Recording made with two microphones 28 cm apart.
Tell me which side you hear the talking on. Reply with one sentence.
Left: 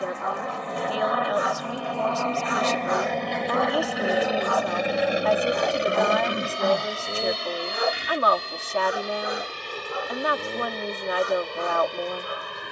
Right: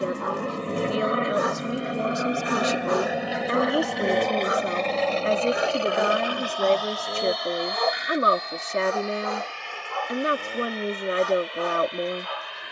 You can hear the talking on the right.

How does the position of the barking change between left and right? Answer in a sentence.
You can hear the barking go from the right side to the left.